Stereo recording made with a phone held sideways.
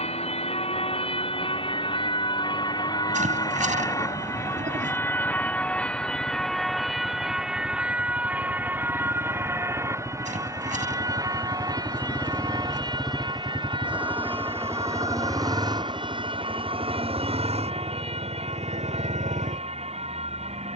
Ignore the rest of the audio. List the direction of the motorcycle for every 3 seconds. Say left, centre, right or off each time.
left, left, left, left, centre, right, right.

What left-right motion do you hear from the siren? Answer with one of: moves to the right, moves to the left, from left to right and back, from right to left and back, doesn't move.
moves to the right.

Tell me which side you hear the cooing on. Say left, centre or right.
right.